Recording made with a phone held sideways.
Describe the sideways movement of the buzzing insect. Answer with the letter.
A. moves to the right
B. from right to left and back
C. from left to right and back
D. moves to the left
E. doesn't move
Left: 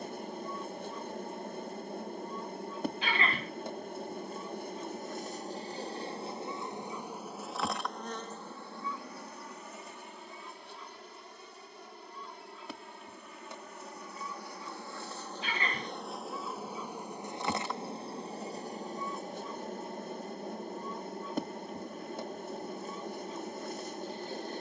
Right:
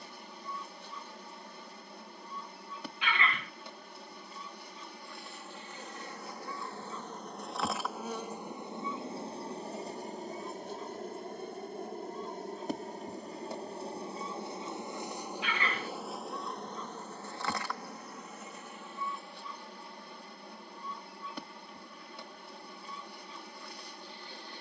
C.